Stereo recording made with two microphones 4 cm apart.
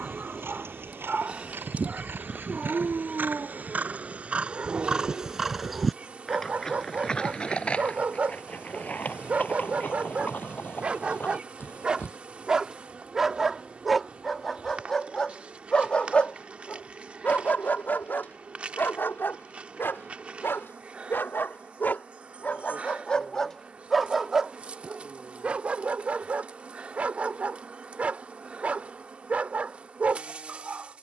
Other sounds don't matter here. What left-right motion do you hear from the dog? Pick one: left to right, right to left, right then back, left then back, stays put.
left then back.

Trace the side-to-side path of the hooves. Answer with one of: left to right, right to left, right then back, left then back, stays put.
right to left.